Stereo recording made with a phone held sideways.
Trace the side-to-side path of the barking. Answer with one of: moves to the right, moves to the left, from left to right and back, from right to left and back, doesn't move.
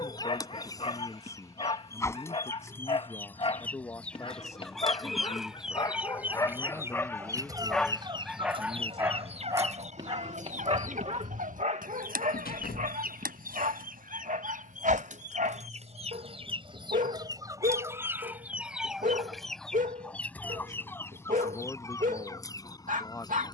moves to the right.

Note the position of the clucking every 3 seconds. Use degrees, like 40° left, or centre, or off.
20° left, centre, 20° right, 60° right, 70° right, 40° right, centre, 20° left.